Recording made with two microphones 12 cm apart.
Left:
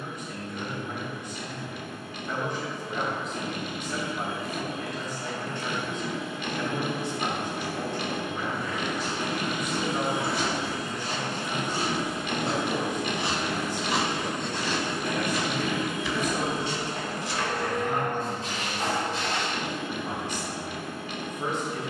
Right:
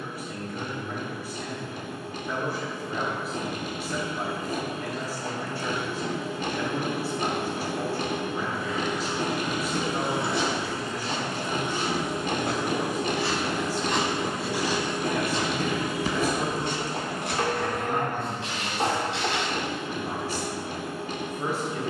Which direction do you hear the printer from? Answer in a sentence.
In this clip you hear the printer on the right.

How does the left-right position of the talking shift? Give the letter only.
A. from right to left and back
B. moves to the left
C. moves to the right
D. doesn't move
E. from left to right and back
D.